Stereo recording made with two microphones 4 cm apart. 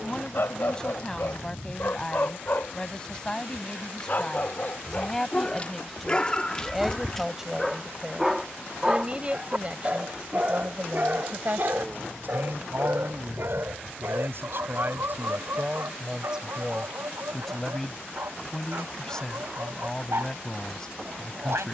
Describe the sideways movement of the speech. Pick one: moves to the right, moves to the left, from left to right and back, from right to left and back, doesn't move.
from left to right and back.